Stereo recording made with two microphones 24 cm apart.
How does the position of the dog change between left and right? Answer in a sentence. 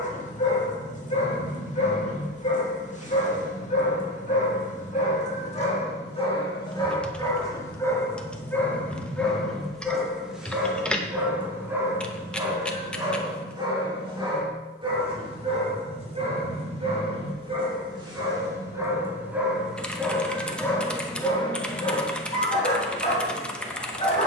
You can hear the dog move from left to right and back again.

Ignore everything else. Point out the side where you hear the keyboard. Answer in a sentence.
In this clip you hear the keyboard in the centre.